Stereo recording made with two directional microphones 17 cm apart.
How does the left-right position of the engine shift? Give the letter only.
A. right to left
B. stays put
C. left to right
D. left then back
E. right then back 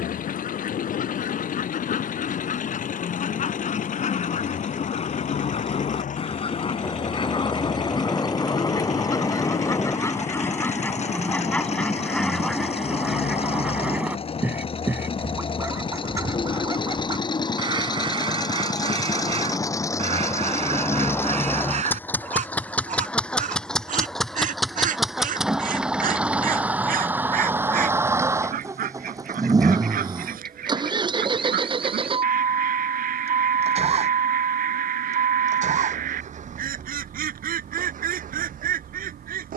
C.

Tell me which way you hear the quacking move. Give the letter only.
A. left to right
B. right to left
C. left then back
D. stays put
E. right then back
A.